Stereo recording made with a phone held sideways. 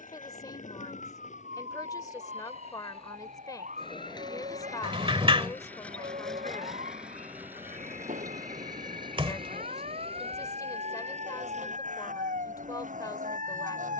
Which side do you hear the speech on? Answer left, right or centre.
left.